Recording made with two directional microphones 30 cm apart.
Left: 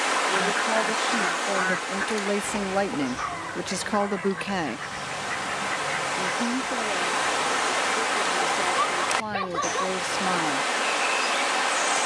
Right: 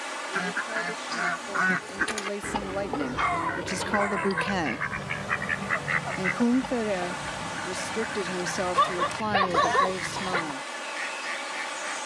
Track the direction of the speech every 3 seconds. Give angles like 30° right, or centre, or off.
50° left, 10° left, 40° right, 10° left.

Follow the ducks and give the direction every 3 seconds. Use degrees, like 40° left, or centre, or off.
20° right, 40° right, 50° right, 50° right.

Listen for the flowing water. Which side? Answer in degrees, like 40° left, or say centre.
60° left.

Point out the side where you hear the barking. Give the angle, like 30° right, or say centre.
40° right.